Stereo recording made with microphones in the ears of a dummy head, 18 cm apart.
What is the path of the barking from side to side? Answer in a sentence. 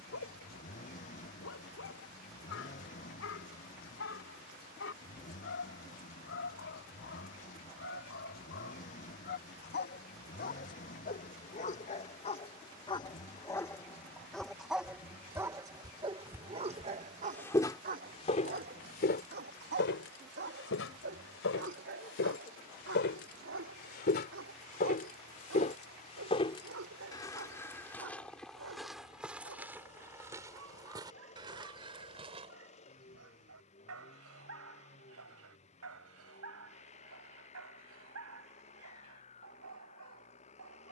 In this clip you hear the barking go from the left side to the right.